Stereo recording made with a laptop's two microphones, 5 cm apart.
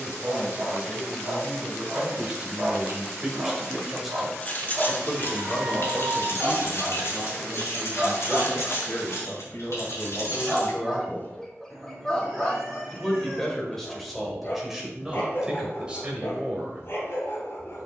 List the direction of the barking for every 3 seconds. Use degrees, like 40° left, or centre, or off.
60° right, 50° right, 30° right, centre, 30° left, 50° left.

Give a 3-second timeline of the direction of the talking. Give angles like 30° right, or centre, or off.
20° right, centre, 40° left, 50° left, centre, 20° right.